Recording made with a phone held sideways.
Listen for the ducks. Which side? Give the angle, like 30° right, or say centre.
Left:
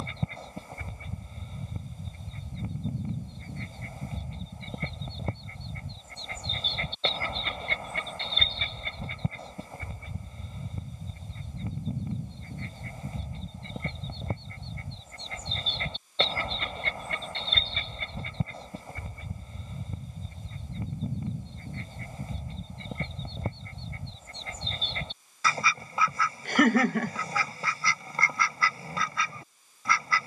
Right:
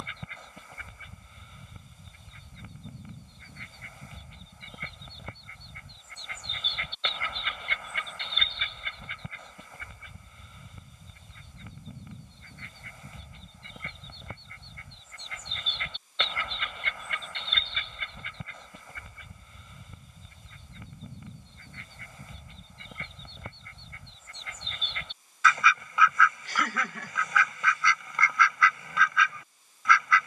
40° left.